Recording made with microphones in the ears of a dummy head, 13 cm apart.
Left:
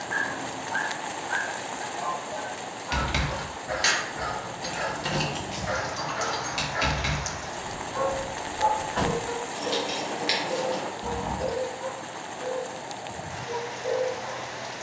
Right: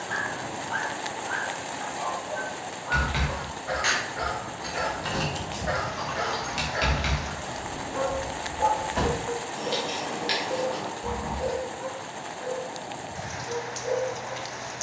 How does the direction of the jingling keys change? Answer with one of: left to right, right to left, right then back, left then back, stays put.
right then back.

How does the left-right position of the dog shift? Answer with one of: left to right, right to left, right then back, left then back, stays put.
right to left.